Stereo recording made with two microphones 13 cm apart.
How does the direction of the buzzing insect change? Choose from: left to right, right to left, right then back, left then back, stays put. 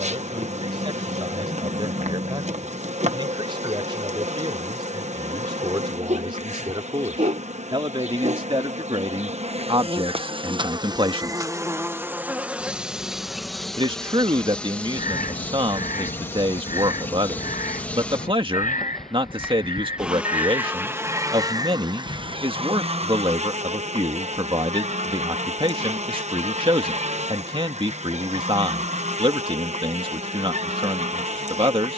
left then back.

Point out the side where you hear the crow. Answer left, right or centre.
left.